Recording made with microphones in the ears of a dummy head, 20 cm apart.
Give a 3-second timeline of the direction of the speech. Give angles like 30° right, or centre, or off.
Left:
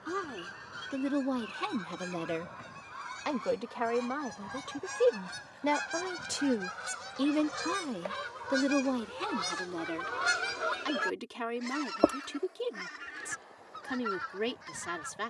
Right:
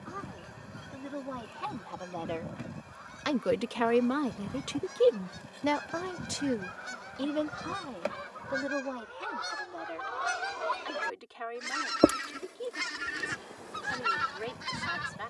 40° left, 30° right, 30° left, 50° left, 50° left.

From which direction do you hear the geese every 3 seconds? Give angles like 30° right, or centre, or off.
70° left, 70° left, 60° left, 20° left, 60° right.